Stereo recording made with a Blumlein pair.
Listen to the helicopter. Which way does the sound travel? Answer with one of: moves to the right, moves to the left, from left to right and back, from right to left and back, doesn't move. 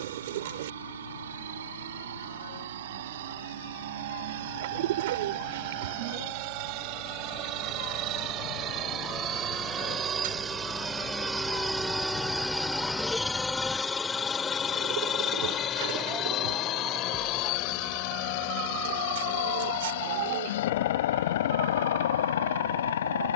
moves to the left.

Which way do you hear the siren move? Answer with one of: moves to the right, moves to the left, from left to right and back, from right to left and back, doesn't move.
moves to the right.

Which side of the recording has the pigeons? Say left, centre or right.
right.